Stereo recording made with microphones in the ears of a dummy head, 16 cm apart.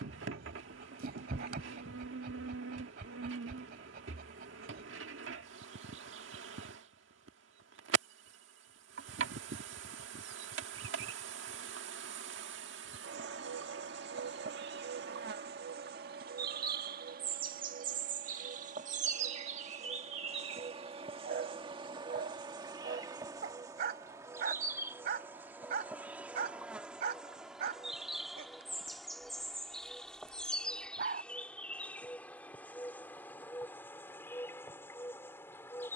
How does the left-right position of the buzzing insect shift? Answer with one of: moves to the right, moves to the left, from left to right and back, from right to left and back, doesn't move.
moves to the left.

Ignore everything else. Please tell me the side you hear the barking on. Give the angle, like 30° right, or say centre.
50° right.